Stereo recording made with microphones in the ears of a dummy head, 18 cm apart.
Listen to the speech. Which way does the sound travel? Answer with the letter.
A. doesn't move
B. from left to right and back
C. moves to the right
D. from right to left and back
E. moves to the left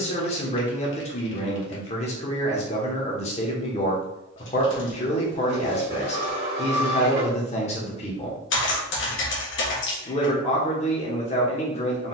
A.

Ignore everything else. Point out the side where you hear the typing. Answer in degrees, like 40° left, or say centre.
60° left.